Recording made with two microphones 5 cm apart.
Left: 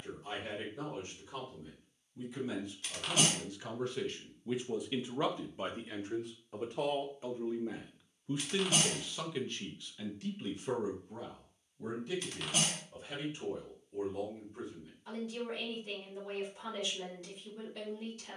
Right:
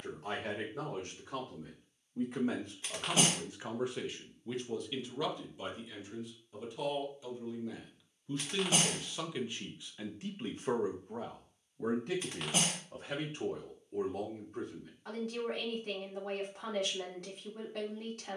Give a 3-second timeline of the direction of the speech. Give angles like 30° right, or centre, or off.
50° right, centre, 30° left, 30° right, 50° right, 50° right.